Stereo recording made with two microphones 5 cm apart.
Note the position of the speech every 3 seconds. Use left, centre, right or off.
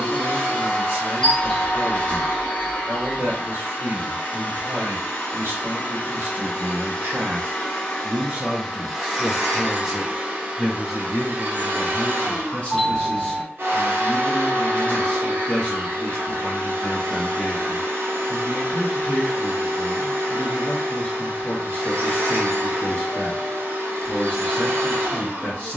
right, right, right, centre, left, left, left, left, left.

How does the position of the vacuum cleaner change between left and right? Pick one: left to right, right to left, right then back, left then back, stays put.
left to right.